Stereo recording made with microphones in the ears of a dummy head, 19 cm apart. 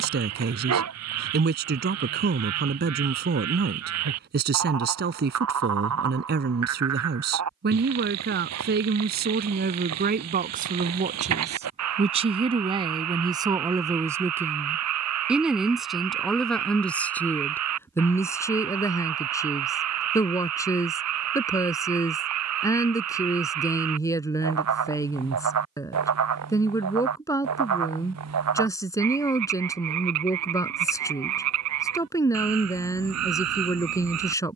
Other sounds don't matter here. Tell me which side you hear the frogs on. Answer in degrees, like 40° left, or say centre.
80° right.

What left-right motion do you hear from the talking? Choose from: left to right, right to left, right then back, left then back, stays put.
right to left.